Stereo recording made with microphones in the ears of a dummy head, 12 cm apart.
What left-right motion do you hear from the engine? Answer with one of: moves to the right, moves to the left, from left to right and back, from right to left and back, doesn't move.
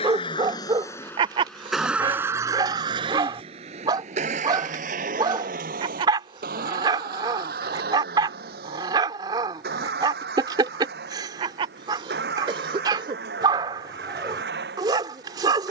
moves to the right.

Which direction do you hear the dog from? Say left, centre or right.
right.